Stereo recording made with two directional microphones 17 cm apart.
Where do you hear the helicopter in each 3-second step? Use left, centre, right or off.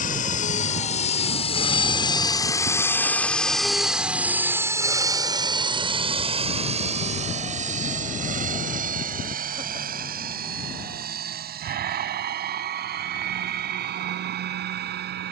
left, centre, right, right, right.